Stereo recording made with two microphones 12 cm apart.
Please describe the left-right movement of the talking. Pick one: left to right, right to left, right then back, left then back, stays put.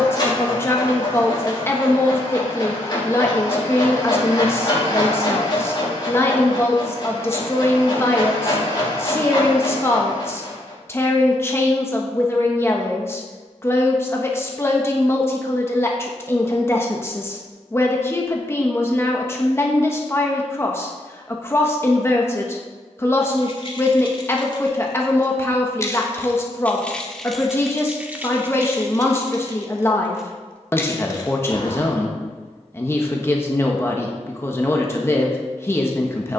stays put.